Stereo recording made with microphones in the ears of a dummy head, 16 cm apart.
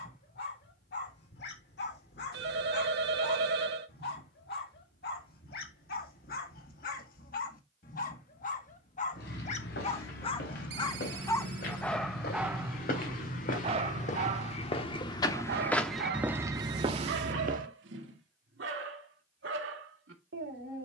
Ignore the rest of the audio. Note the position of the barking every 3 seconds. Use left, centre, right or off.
left, left, left, left, right, right, right.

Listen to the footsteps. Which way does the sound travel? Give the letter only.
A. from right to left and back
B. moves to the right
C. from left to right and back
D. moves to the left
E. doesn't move
B.